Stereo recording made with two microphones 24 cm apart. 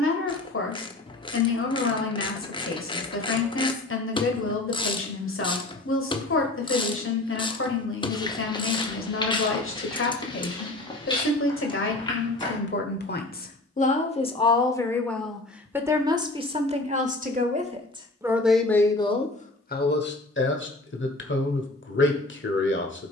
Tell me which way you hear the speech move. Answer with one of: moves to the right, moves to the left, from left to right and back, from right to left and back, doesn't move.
from left to right and back.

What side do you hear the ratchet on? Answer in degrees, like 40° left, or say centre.
20° left.